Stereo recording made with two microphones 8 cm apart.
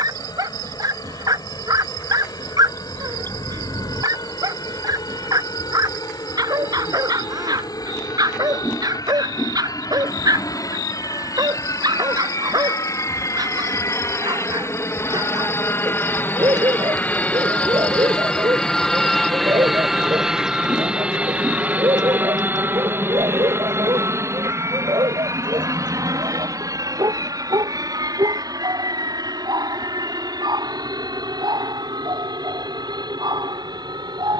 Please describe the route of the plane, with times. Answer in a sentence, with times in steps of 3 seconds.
In this clip you hear the plane on the left from 0 s, in the centre from 18 s and on the right from 21 s.